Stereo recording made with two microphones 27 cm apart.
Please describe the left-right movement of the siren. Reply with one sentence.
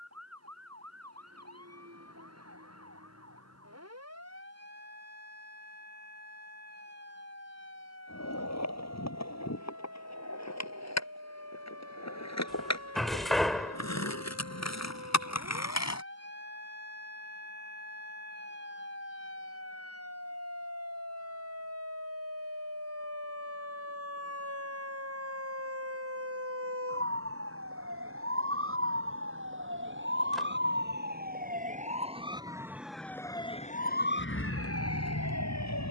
You can hear the siren travel towards the left.